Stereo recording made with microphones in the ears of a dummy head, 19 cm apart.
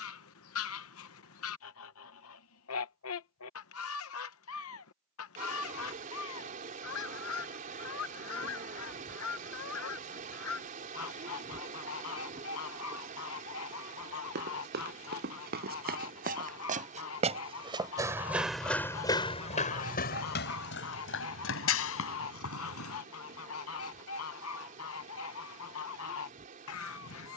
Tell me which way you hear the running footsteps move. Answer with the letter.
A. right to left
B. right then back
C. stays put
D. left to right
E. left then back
A.